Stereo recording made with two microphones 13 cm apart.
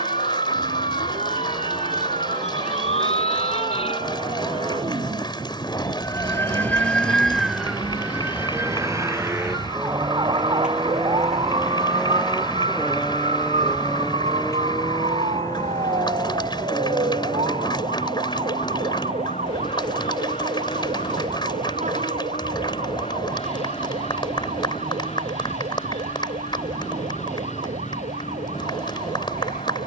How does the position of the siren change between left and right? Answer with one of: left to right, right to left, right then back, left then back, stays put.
left to right.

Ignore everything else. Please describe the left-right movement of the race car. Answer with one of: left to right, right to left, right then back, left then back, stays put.
right to left.